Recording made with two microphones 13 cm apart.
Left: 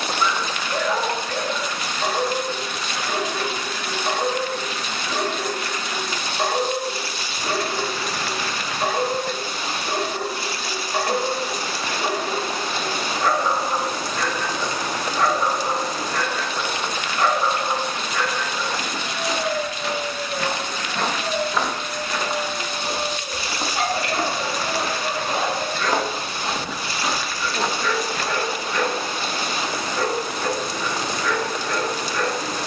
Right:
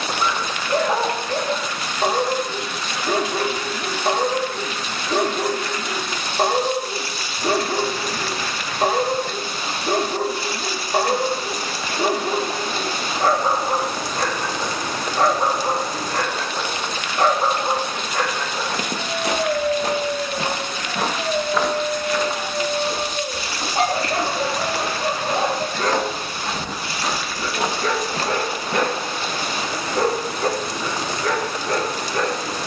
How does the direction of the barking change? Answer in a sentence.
You can hear the barking stay in one place.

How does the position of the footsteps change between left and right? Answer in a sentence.
You can hear the footsteps move from right to left and back again.